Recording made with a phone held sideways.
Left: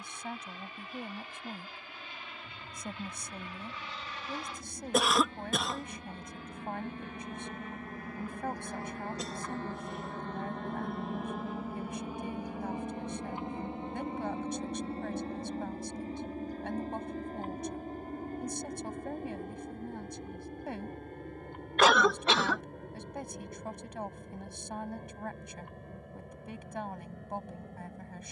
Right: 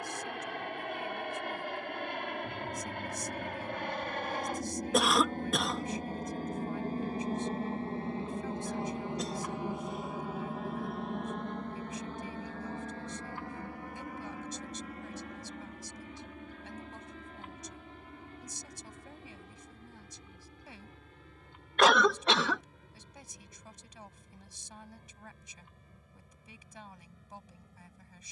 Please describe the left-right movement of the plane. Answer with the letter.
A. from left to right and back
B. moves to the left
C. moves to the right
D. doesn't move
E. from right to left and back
B.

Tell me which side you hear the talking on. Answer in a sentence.
You can hear the talking on the left.